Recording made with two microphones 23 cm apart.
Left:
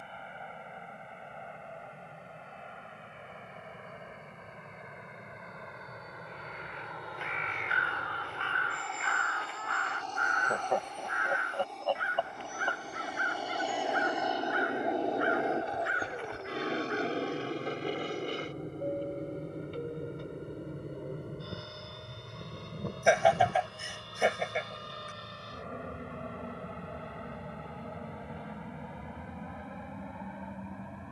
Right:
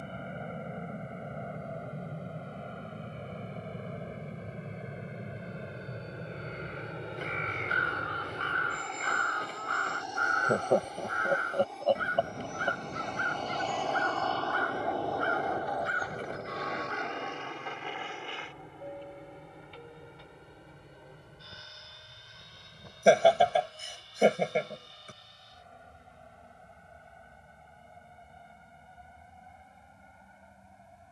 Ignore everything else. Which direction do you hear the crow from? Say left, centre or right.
right.